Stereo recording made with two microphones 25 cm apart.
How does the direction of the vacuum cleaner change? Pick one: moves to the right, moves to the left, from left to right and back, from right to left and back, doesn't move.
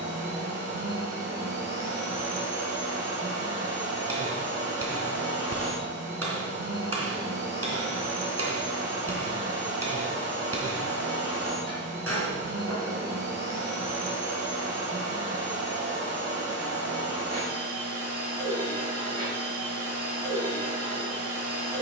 doesn't move.